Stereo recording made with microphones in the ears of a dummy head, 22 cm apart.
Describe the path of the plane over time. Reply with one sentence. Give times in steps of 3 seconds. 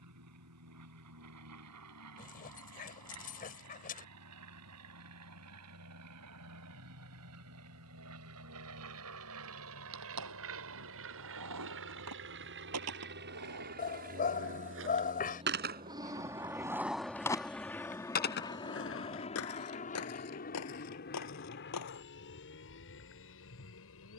You can hear the plane on the right from 0 s, in the centre from 15 s and on the left from 18 s.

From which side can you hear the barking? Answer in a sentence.
In this clip you hear the barking on the left.